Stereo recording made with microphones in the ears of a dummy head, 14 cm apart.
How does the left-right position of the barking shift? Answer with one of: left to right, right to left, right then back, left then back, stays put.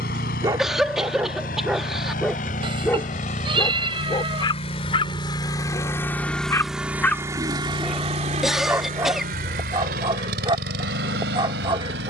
left then back.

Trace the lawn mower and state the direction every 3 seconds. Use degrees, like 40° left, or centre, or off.
60° left, 40° left, 20° right, 70° right.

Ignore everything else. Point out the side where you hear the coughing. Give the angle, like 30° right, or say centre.
centre.